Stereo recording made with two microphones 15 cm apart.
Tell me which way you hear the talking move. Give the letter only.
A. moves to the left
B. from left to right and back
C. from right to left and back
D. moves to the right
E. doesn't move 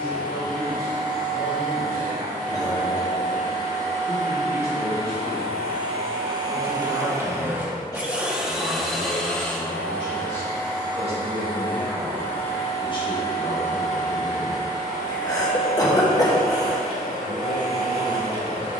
B.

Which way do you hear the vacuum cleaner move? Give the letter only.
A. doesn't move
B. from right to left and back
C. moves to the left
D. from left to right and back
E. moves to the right
C.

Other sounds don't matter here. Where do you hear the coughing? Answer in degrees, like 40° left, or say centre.
20° left.